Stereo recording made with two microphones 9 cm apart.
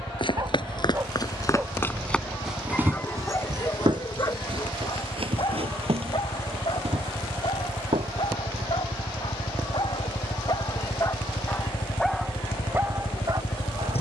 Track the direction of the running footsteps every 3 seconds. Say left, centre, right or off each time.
left, right, right, off, off.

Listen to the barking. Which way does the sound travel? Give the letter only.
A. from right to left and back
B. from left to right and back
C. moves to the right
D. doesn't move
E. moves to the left
A.